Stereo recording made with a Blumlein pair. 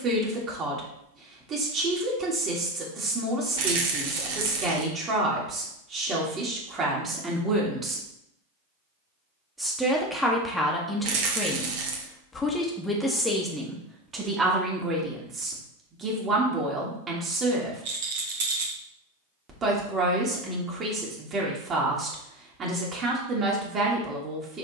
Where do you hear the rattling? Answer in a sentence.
You can hear the rattling on the right.